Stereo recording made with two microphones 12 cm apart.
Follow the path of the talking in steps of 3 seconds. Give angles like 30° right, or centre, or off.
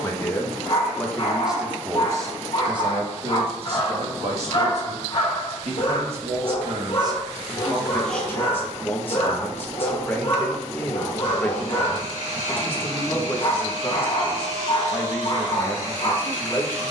10° right, 60° right, 20° right, 20° left, 20° left, 20° left.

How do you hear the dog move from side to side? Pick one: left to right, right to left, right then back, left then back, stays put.
stays put.